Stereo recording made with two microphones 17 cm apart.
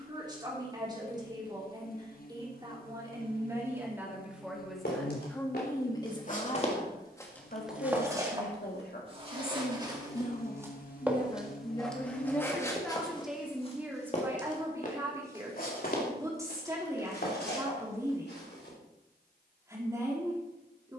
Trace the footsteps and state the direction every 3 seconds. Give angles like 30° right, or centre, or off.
off, 70° left, 10° left, 20° right, 30° left, 60° left, 70° left.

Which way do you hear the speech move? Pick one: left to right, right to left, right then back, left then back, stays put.
left then back.